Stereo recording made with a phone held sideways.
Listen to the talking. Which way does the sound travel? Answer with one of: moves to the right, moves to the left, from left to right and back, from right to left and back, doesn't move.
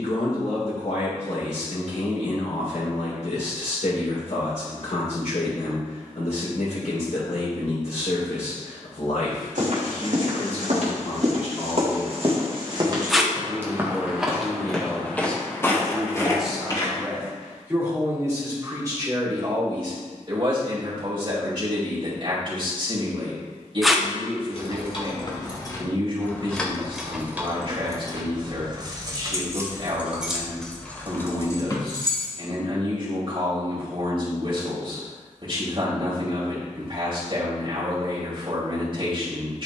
moves to the right.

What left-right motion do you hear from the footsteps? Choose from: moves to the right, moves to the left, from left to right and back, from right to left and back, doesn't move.
moves to the left.